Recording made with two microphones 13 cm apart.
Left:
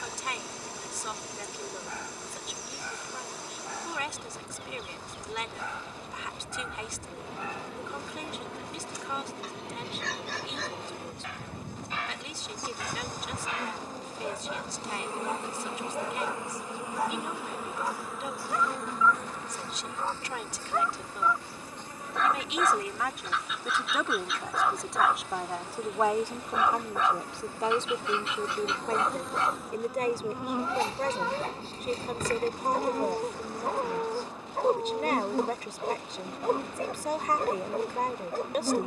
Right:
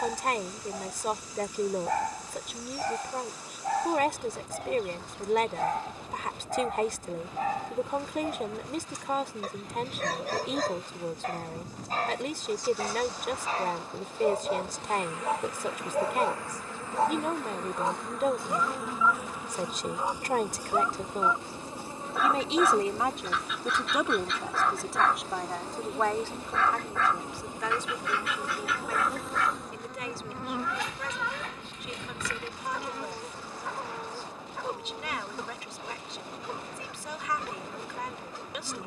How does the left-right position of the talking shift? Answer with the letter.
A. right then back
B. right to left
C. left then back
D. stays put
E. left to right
B.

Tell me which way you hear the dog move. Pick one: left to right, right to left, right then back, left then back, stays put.
right to left.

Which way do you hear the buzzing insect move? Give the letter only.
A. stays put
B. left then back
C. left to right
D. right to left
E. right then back
E.